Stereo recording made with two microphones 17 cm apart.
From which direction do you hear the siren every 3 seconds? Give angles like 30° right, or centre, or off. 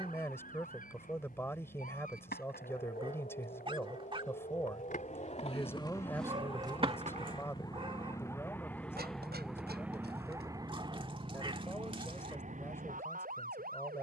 60° left, 50° left, 20° left, 20° right, 50° right.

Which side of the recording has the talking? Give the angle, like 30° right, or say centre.
10° left.